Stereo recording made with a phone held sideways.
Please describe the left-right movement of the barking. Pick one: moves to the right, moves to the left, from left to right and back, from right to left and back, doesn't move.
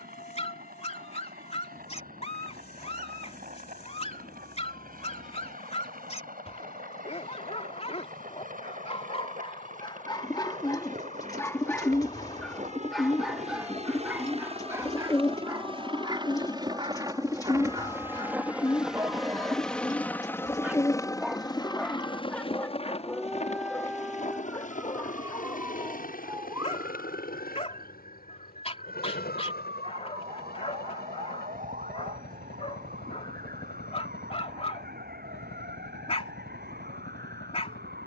from left to right and back.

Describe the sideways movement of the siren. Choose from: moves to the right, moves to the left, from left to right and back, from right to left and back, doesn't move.
moves to the right.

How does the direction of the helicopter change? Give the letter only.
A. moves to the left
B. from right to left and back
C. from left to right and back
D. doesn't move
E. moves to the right
A.